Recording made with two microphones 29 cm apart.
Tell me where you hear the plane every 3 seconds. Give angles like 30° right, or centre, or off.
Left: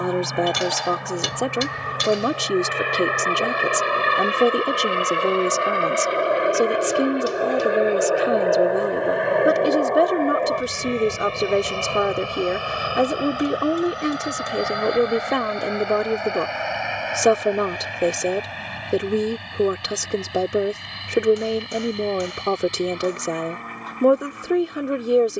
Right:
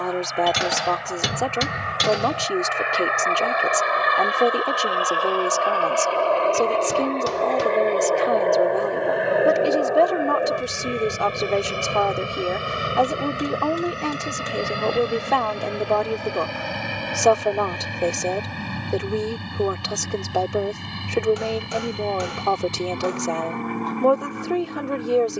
50° left, 30° left, 10° left, 10° right, 30° right, 40° right, 50° right, 50° right, 60° right.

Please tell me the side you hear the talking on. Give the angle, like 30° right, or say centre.
20° left.